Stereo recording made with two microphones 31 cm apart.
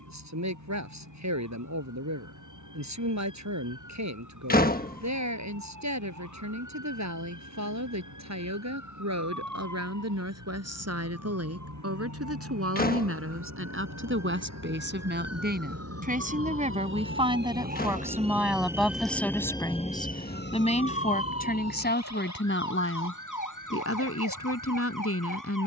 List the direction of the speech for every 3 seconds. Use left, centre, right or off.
right, right, right, right, right, right, centre, left, left.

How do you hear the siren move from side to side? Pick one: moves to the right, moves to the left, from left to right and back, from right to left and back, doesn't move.
moves to the left.